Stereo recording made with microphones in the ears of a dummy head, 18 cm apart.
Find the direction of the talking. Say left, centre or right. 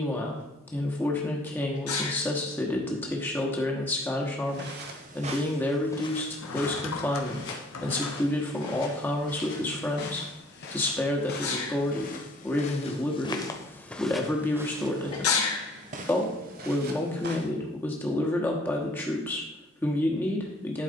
centre.